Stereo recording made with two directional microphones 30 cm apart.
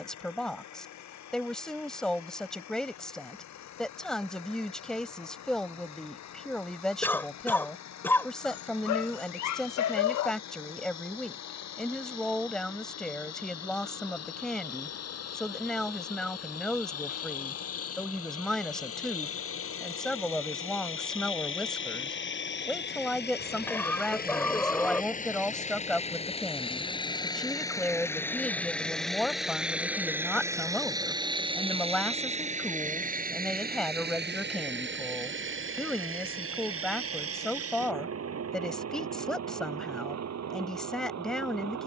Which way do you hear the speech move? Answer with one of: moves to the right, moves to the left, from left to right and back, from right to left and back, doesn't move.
doesn't move.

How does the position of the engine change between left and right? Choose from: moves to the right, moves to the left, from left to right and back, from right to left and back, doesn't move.
moves to the right.